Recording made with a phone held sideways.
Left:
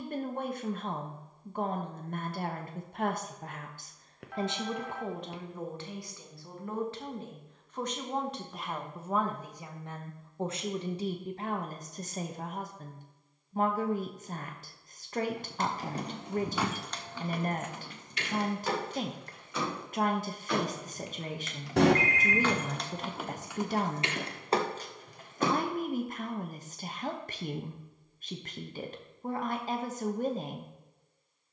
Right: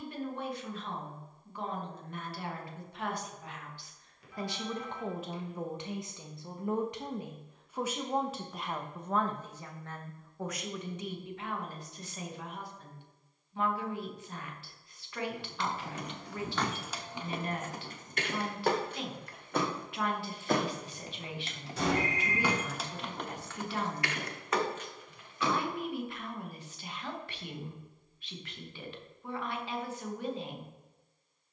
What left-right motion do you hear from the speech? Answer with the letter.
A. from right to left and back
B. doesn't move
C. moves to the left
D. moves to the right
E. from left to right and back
E.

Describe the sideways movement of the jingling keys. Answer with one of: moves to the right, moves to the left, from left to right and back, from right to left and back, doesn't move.
from left to right and back.